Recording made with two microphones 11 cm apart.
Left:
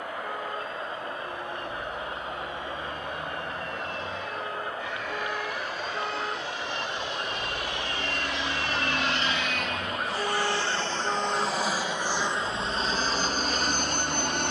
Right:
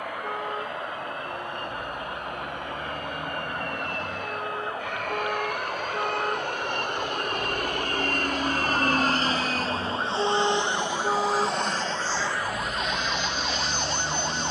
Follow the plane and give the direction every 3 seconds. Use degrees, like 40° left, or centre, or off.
80° right, 70° right, 60° right, 20° right, 40° left.